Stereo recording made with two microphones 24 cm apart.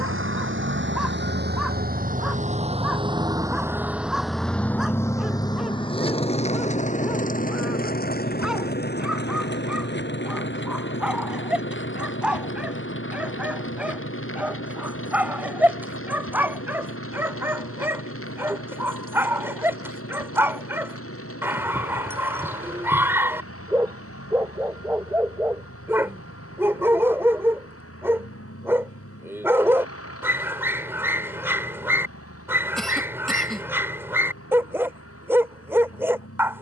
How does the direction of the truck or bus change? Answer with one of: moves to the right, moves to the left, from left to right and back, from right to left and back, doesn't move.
moves to the left.